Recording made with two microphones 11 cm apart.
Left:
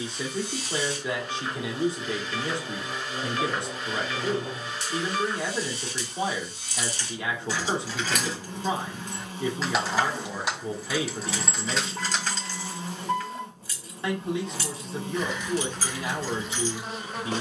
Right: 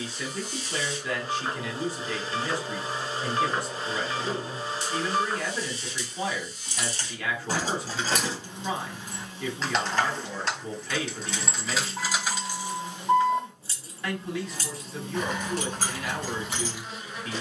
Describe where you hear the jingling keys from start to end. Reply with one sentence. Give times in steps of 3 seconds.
You can hear the jingling keys not at all from 0 s, on the right from 6 s, in the centre from 9 s and on the right from 12 s.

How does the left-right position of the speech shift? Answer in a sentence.
You can hear the speech stay in one place.